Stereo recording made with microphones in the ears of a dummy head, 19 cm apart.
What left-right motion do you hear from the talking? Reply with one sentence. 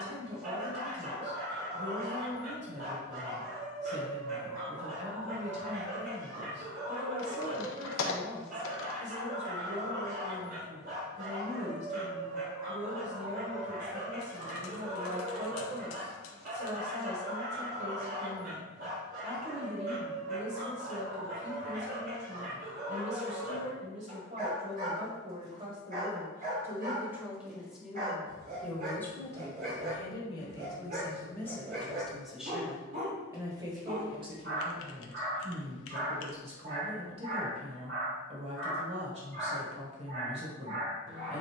You can hear the talking go left and come back.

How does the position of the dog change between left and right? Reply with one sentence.
In this clip you hear the dog stay in one place.